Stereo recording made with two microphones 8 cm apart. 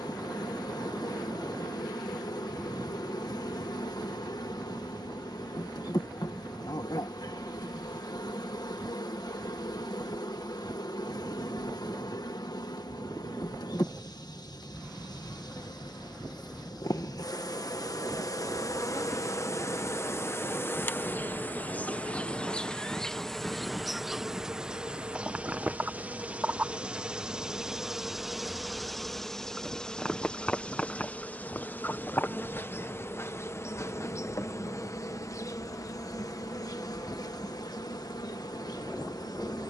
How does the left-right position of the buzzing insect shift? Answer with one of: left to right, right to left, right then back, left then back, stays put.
right then back.